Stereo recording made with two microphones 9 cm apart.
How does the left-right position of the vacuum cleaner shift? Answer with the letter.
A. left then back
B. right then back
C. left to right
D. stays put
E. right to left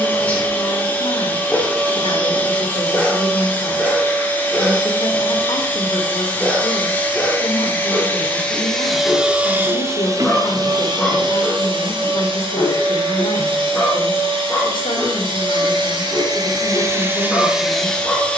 B.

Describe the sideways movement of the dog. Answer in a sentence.
You can hear the dog stay put.